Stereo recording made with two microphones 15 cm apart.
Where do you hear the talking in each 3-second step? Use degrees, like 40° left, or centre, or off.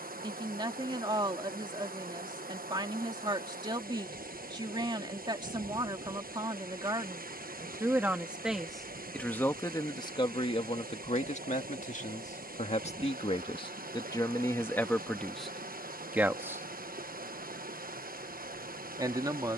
30° right, 30° right, 20° right, 40° left, 30° left, 10° right, 30° right.